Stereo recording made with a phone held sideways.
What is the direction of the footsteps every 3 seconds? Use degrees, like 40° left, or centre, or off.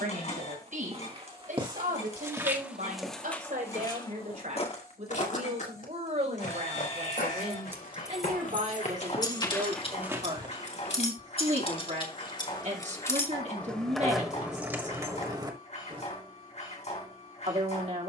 30° right, 30° left, 70° left, centre, off, off.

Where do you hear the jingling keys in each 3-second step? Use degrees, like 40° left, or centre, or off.
off, off, centre, 40° left, 10° left, 30° right.